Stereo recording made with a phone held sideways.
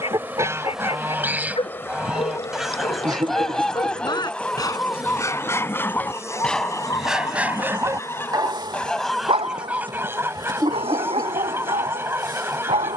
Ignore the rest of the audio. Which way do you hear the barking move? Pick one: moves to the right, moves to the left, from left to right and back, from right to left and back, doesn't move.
moves to the right.